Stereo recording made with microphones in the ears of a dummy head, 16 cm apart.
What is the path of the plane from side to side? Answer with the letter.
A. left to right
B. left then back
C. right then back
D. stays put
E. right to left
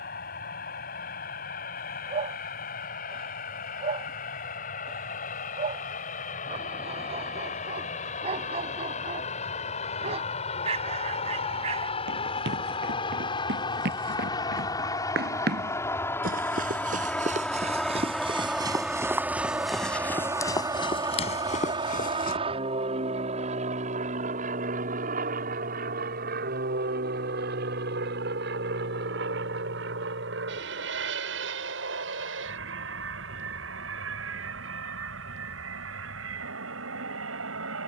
A.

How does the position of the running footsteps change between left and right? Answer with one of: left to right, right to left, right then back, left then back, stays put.
right to left.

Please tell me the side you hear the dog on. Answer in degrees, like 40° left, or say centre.
40° right.